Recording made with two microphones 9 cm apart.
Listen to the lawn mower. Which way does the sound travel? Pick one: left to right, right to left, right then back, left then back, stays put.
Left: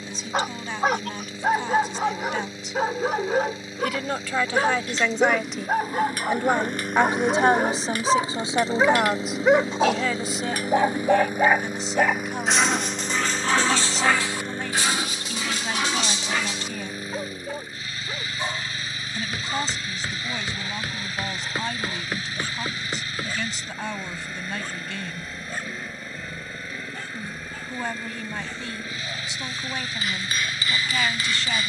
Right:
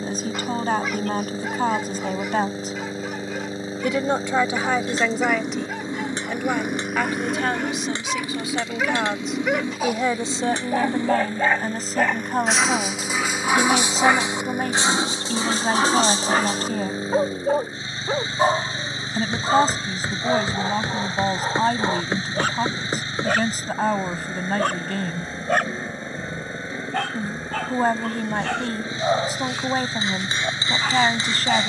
left then back.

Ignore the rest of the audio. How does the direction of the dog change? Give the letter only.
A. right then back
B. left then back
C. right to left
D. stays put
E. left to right
E.